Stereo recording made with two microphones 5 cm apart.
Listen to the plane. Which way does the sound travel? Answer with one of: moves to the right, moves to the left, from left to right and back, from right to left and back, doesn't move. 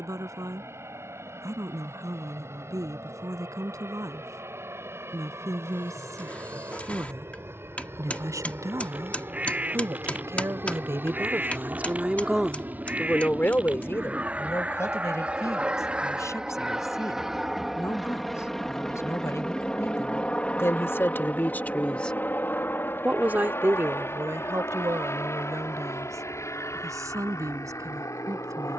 moves to the left.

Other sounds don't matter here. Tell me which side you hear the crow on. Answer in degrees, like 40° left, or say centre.
30° right.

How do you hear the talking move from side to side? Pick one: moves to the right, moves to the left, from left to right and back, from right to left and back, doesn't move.
from right to left and back.